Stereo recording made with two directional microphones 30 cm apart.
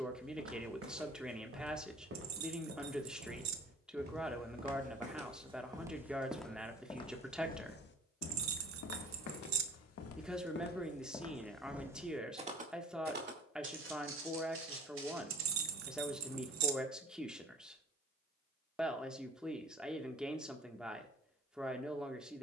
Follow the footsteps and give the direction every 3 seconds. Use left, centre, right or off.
right, right, left, left, right, right, off, off.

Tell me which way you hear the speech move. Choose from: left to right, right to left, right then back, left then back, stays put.
stays put.